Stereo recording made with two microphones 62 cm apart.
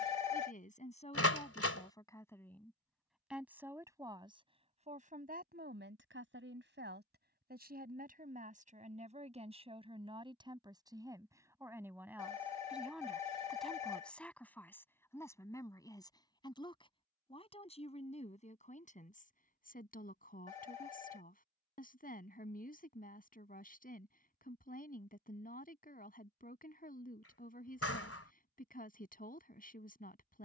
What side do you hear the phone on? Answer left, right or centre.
left.